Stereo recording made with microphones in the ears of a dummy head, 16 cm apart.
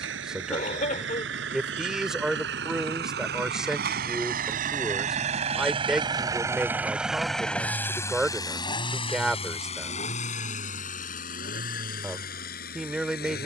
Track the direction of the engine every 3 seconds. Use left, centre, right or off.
right, right, centre, left, left.